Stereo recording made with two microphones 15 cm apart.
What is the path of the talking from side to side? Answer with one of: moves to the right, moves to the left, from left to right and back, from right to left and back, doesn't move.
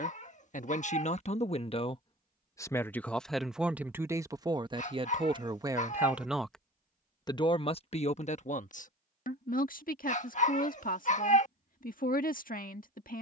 from left to right and back.